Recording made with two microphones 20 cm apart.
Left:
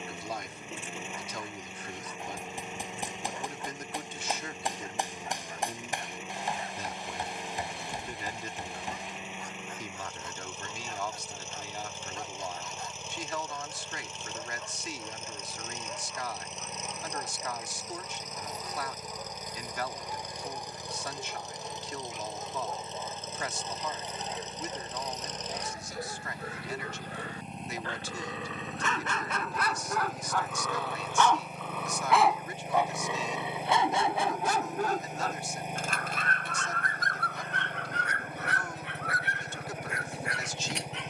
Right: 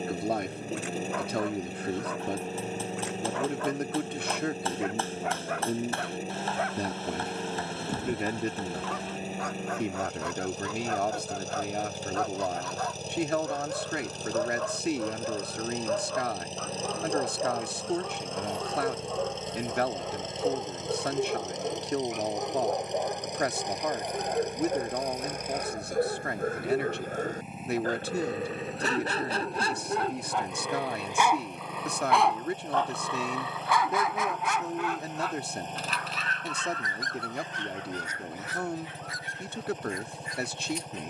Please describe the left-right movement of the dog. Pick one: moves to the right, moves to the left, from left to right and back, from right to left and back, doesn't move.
moves to the left.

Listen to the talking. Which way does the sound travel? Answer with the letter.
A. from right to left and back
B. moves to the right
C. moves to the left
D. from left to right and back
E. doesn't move
E.